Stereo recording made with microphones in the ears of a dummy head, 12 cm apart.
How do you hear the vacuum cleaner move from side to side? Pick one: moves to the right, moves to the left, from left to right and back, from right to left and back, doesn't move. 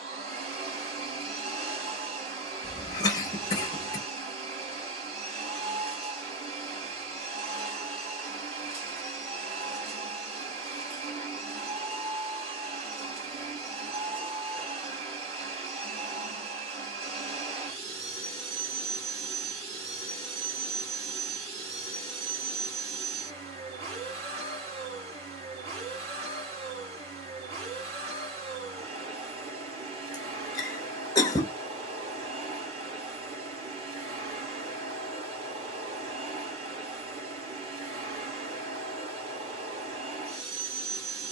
doesn't move.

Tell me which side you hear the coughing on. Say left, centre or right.
left.